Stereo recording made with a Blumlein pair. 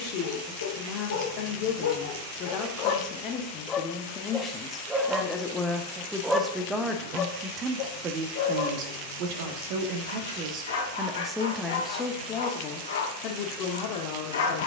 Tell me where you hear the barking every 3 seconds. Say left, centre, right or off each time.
left, centre, left, left, left.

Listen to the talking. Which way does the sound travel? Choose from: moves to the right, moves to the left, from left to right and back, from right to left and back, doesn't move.
from left to right and back.